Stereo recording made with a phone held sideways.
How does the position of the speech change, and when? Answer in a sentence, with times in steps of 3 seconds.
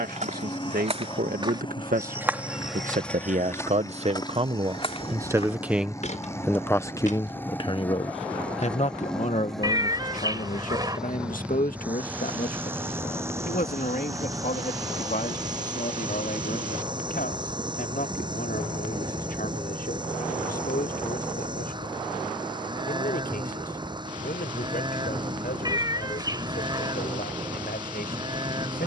In this clip you hear the speech on the right from 0 s and on the left from 6 s.